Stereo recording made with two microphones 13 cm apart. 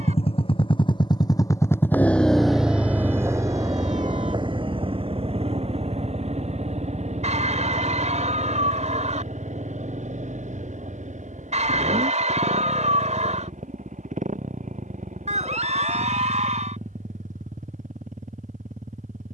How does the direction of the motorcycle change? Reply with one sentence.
In this clip you hear the motorcycle move to the right.